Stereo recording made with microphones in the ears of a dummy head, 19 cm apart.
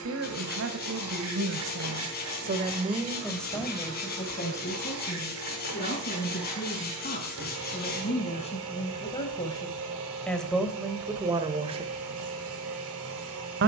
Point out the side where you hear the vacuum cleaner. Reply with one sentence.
You can hear the vacuum cleaner on the right.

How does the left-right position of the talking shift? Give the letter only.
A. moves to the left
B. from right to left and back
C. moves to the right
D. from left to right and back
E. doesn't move
B.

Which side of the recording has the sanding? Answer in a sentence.
You can hear the sanding on the left.